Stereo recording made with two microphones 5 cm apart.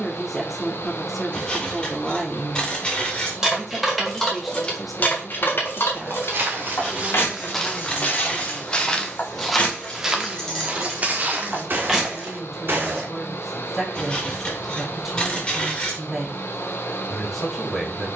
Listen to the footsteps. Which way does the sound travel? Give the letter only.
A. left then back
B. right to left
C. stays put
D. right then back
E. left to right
A.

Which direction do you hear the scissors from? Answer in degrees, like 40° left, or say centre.
20° left.